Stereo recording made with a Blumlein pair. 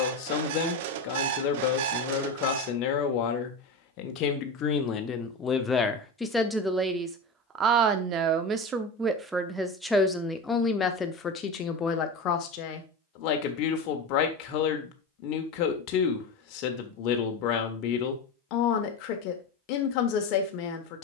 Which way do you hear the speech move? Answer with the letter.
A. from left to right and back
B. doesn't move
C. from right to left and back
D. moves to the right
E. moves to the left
A.